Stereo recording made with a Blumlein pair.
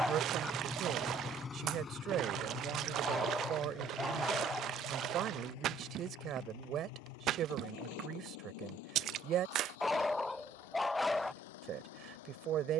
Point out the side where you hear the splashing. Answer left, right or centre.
right.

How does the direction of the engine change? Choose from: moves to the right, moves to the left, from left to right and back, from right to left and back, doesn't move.
moves to the left.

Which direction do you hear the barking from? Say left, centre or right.
centre.